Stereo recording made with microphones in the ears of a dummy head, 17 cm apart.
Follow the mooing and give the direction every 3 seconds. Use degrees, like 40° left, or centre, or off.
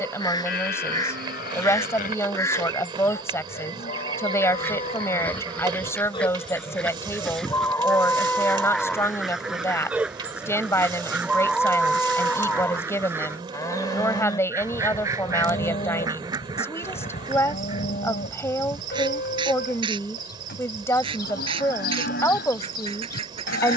50° left, 40° left, 10° left, centre, 20° left, 30° left, 50° left, 50° left.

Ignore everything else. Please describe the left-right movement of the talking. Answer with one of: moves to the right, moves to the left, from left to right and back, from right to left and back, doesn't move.
doesn't move.